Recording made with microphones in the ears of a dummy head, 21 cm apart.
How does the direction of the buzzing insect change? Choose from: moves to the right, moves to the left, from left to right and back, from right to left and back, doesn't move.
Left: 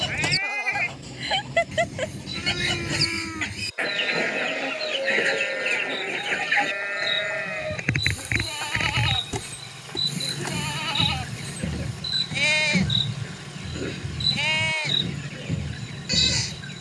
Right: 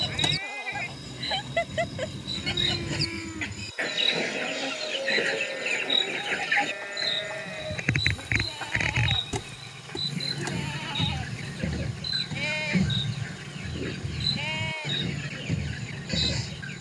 moves to the left.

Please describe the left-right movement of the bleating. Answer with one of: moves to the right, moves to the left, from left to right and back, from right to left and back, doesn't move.
doesn't move.